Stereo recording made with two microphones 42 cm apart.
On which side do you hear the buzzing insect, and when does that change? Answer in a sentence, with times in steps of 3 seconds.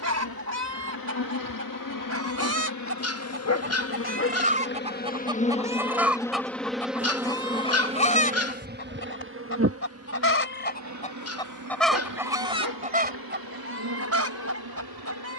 In this clip you hear the buzzing insect on the left from 0 s, in the centre from 6 s and on the right from 9 s.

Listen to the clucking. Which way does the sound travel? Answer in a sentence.
You can hear the clucking move from right to left and back again.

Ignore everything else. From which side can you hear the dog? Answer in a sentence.
In this clip you hear the dog on the left.